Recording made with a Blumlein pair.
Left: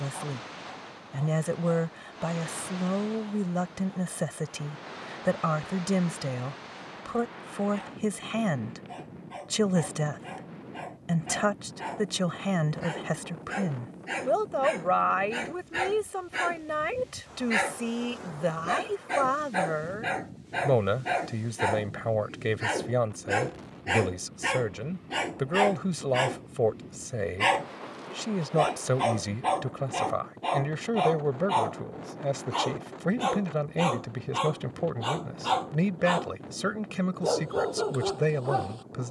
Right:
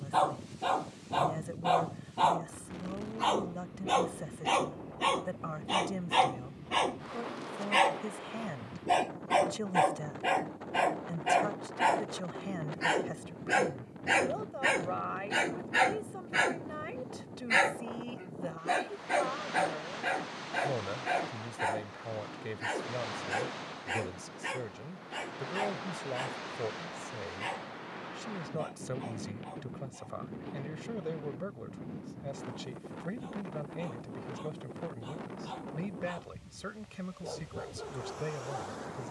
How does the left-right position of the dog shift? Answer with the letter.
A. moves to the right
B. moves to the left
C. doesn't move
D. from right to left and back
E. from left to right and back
B.